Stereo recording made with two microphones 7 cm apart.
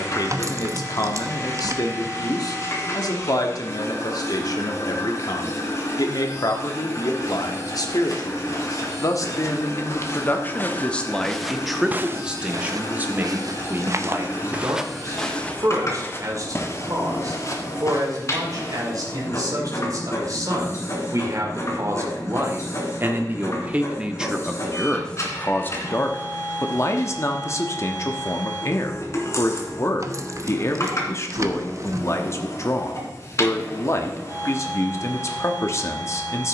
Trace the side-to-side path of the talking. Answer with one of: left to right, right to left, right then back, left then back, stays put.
right then back.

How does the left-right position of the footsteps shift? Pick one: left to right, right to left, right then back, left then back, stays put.
right then back.